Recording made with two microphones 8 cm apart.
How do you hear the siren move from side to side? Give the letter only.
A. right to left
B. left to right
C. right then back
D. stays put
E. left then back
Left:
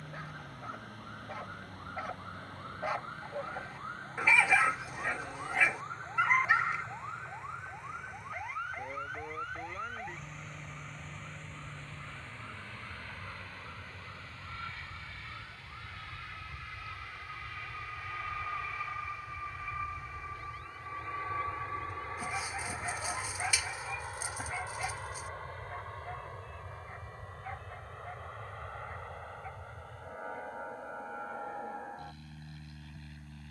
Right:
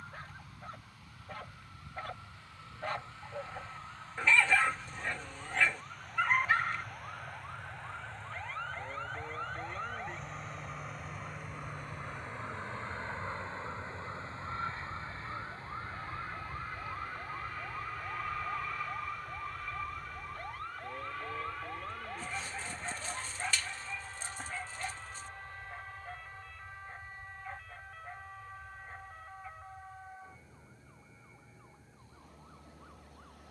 B.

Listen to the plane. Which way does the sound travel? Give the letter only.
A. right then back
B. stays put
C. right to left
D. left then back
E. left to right
C.